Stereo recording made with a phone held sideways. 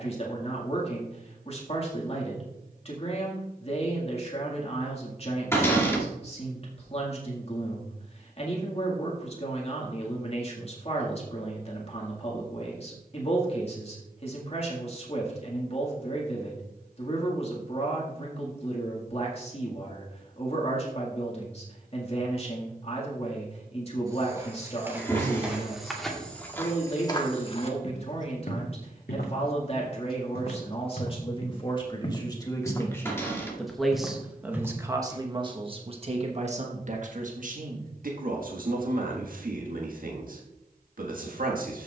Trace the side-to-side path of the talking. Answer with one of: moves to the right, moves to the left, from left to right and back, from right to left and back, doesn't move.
moves to the right.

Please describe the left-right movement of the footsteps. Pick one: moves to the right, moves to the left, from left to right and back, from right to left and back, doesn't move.
from right to left and back.